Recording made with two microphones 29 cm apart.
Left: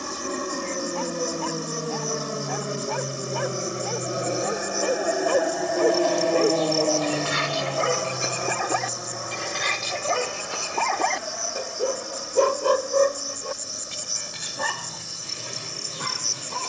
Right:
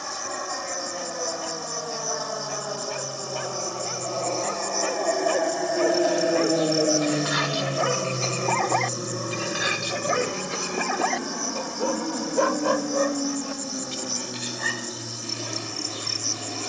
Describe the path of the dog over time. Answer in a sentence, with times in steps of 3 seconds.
In this clip you hear the dog on the left from 0 s, in the centre from 9 s and on the left from 12 s.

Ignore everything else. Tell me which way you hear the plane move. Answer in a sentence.
In this clip you hear the plane go from the left side to the right.